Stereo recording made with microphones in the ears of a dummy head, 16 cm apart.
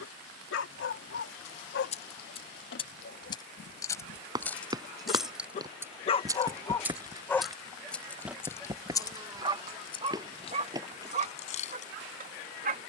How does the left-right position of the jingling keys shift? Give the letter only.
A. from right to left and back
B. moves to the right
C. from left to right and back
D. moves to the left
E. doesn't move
C.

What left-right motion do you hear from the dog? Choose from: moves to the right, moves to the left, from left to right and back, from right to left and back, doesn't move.
moves to the right.